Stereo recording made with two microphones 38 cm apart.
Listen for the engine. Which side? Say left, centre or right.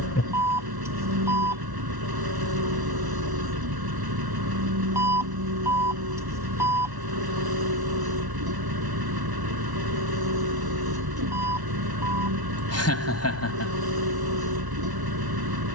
right.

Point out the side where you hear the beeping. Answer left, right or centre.
centre.